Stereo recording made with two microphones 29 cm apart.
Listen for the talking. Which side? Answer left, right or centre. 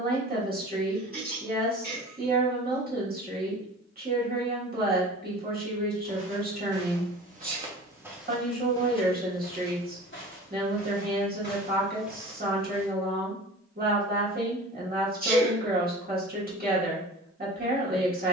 right.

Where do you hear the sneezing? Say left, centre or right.
right.